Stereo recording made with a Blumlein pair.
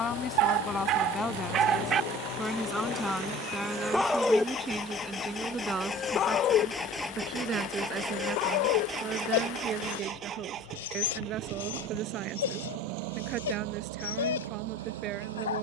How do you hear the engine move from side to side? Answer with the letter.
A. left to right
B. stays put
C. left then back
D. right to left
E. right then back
A.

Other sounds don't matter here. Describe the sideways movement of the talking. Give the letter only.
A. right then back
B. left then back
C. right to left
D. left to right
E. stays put
D.